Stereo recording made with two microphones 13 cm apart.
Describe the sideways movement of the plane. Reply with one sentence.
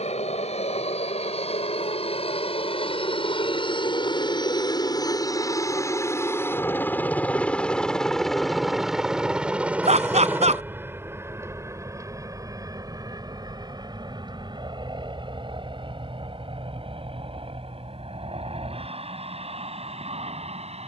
In this clip you hear the plane move to the right.